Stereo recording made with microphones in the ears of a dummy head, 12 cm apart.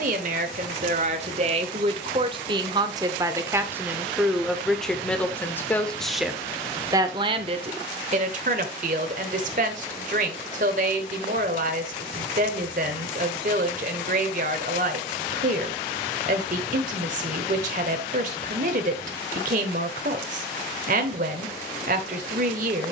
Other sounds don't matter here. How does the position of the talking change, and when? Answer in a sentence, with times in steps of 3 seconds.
In this clip you hear the talking on the right from 0 s, in the centre from 3 s and on the right from 6 s.